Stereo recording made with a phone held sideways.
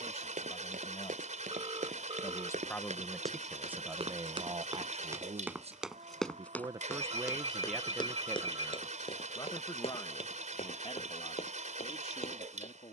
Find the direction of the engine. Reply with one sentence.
In this clip you hear the engine on the right.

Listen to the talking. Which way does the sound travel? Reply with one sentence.
You can hear the talking go right and come back.